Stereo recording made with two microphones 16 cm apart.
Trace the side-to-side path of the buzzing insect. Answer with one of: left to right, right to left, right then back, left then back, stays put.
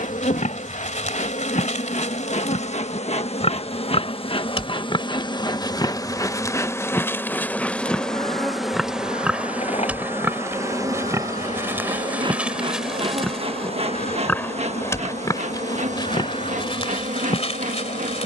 left to right.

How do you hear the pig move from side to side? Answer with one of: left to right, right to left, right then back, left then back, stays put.
right then back.